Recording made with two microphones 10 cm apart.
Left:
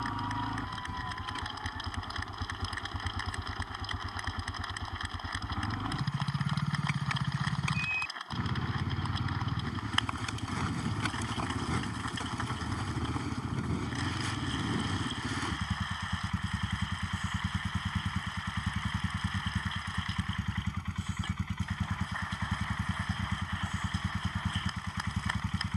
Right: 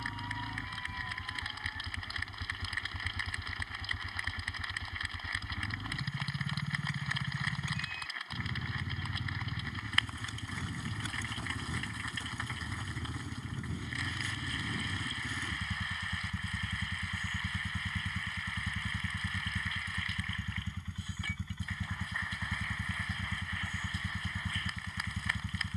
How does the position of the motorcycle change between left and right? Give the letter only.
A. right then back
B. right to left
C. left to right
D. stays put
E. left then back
D.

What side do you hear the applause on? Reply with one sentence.
You can hear the applause on the left.